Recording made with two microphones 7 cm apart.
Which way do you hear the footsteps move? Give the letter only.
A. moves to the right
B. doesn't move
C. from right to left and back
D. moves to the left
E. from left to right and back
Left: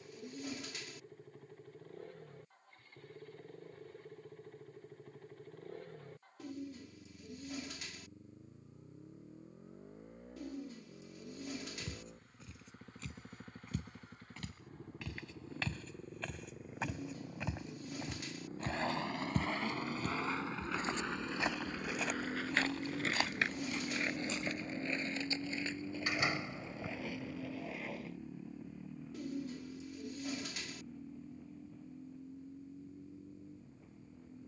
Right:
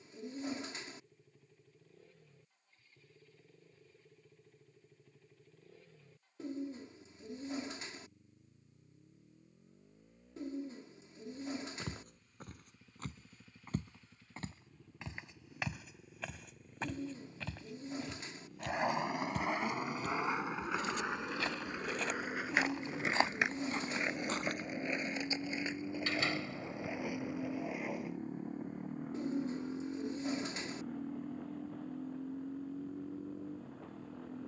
C.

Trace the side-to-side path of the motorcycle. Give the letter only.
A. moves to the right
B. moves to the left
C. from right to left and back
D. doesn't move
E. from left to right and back
A.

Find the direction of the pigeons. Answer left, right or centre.
right.